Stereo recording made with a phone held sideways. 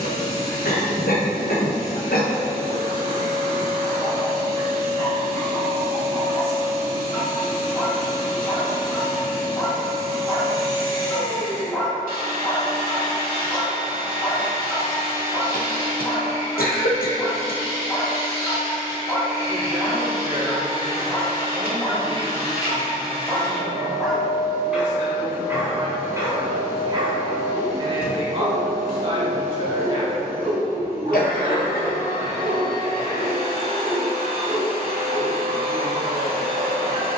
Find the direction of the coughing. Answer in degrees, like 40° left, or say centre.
80° left.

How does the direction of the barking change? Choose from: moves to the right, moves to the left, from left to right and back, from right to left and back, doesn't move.
moves to the right.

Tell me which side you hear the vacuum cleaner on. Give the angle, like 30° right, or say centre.
80° right.